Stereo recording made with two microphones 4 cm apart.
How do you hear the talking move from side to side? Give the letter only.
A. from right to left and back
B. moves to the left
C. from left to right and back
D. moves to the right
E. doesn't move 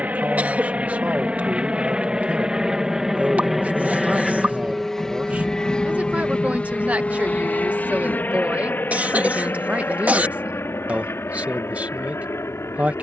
E.